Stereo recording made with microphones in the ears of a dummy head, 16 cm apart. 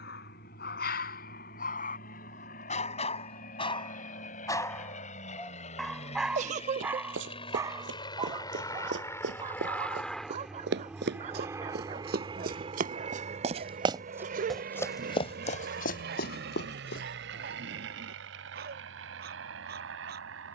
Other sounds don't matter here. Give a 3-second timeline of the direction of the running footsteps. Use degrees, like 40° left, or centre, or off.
off, off, 70° right, 70° right, 30° right, 50° left, off.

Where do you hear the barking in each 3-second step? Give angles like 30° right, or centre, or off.
50° left, 20° left, 20° right, 40° right, 50° right, 50° right, 60° right.